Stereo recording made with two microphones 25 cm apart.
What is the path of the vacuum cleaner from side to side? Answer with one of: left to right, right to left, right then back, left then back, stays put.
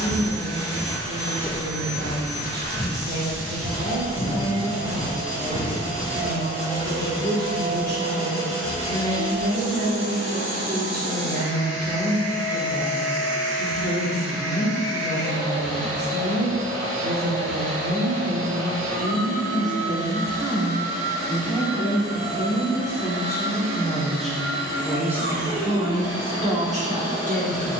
stays put.